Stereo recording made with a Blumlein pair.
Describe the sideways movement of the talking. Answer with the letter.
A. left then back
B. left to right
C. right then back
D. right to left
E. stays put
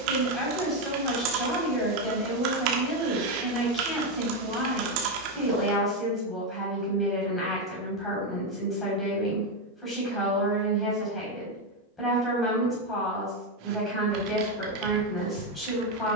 E.